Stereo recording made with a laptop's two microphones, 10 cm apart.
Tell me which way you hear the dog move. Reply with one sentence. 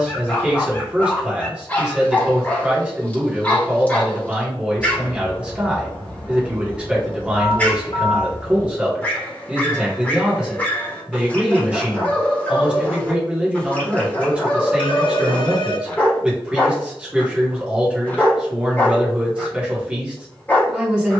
In this clip you hear the dog stay in one place.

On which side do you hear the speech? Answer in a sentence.
In this clip you hear the speech in the centre.